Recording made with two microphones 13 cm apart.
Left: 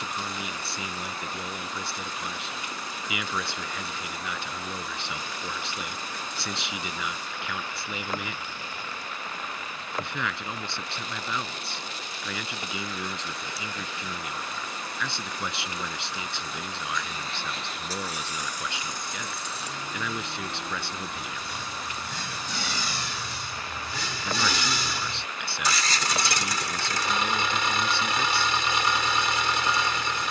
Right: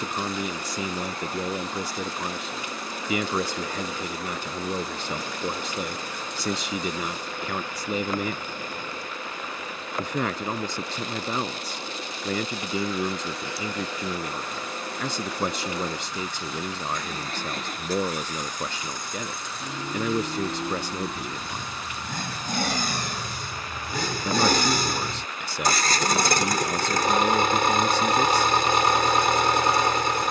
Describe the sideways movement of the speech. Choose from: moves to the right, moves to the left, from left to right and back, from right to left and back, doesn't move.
doesn't move.